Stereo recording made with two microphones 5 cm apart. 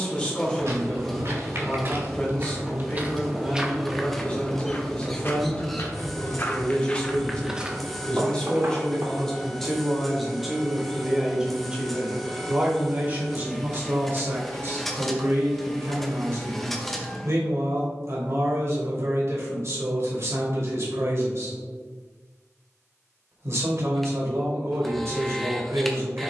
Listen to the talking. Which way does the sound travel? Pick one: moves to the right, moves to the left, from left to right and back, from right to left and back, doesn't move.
moves to the right.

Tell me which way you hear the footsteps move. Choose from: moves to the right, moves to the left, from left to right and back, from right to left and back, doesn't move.
from right to left and back.